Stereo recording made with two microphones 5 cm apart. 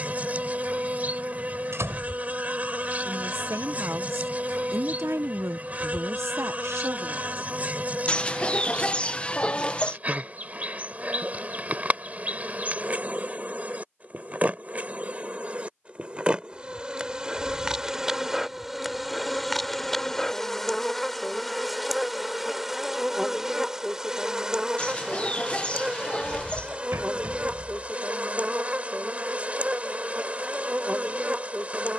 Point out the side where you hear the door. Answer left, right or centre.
right.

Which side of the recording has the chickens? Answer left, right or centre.
left.